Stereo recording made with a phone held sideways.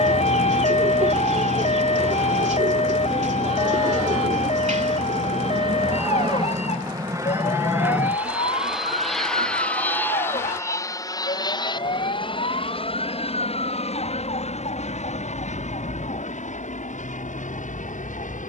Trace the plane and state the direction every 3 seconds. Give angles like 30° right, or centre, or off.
60° right, 50° right, 20° right, 20° left, 50° left, 60° left.